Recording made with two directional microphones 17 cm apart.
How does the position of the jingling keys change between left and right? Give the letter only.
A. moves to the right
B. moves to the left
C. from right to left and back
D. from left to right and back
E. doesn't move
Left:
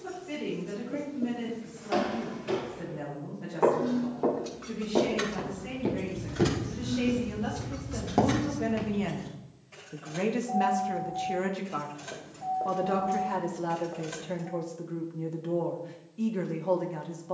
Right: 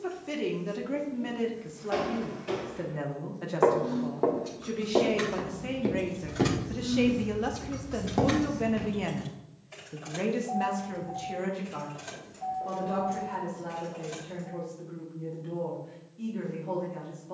D.